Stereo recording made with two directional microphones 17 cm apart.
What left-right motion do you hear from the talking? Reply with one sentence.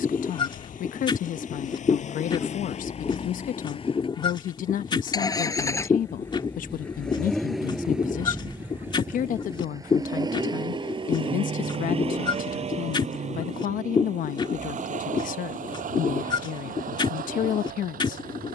In this clip you hear the talking stay put.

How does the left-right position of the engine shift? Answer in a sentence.
You can hear the engine travel towards the right.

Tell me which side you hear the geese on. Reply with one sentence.
You can hear the geese on the left.